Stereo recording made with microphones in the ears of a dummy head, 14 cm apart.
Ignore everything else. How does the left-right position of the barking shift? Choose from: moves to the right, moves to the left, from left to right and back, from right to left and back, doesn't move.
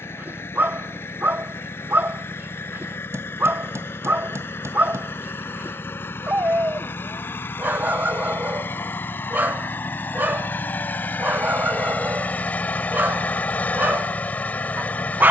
doesn't move.